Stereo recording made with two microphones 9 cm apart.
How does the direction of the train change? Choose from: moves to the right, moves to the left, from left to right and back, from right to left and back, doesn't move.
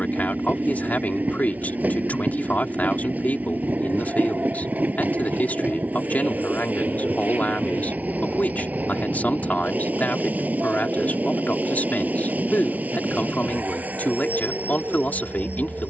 doesn't move.